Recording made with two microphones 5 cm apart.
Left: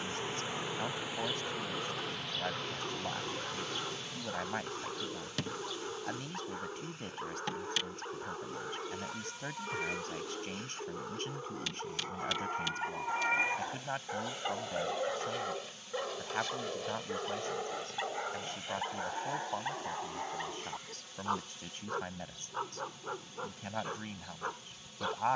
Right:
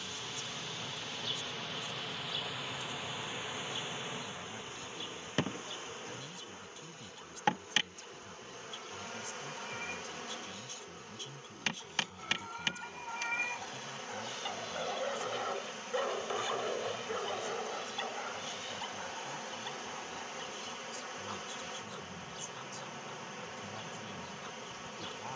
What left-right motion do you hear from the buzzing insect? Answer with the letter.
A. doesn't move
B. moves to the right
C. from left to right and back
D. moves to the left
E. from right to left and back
B.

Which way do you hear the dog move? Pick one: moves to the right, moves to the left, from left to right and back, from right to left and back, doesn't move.
from left to right and back.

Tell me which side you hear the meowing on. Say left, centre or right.
left.